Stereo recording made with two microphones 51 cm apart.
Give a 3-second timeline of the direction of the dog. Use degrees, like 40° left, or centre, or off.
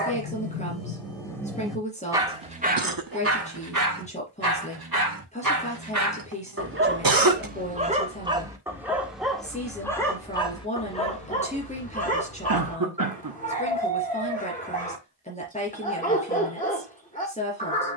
centre, 40° right, 20° right, 10° left, 20° left, 20° left.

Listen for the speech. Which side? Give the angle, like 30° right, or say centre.
10° left.